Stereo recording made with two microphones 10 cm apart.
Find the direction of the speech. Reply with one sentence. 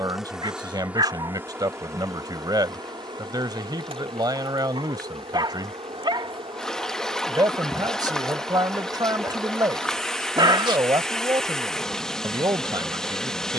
In this clip you hear the speech on the right.